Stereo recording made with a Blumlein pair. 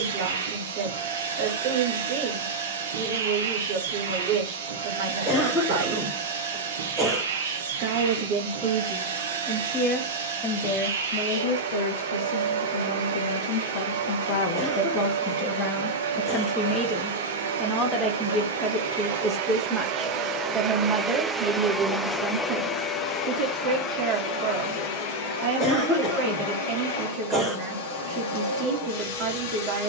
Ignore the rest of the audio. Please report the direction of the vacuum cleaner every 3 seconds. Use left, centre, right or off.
right, right, right, right, right, right, right, centre, left, left.